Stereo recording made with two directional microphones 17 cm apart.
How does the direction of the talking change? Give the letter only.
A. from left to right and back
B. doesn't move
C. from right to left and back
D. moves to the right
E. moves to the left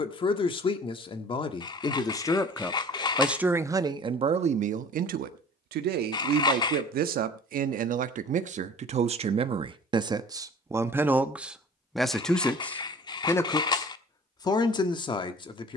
A.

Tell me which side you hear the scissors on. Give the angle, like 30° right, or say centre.
20° left.